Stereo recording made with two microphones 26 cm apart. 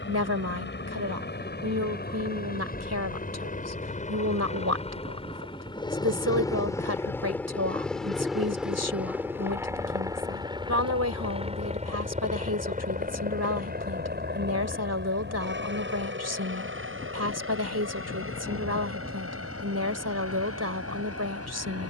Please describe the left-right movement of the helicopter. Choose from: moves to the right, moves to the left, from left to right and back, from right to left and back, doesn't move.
moves to the right.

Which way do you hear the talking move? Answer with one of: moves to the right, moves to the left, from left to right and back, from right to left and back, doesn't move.
doesn't move.